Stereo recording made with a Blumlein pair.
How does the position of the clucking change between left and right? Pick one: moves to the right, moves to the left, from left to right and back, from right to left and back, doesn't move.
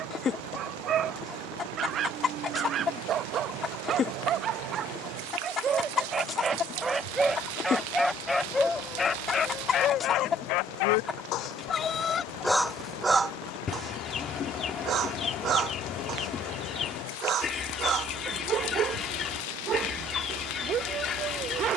doesn't move.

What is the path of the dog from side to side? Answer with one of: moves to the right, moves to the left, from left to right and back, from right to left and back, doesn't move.
from right to left and back.